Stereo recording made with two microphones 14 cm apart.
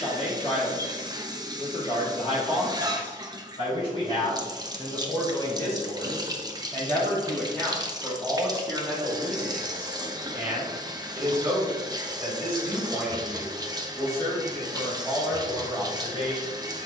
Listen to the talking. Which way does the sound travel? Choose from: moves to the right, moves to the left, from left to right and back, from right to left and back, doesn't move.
from left to right and back.